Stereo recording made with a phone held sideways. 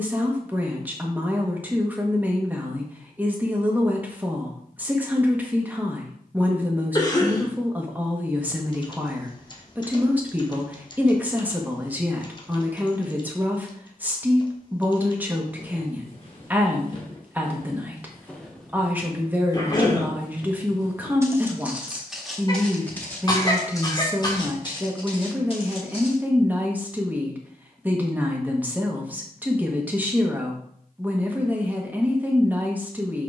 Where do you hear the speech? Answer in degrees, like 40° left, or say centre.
10° right.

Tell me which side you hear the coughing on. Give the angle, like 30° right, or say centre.
30° left.